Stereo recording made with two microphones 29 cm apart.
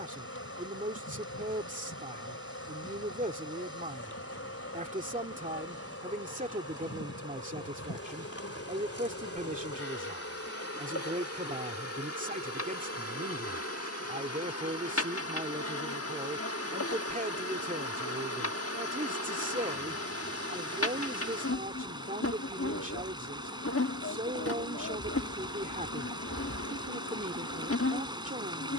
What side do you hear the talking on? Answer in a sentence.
You can hear the talking on the right.